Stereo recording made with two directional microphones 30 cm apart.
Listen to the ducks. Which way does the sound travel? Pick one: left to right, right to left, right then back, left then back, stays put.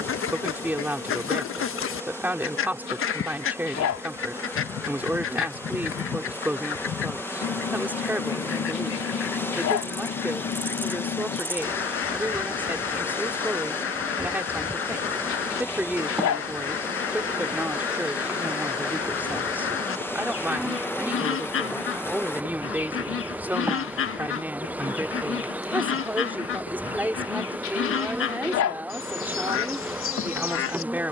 stays put.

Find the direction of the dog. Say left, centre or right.
left.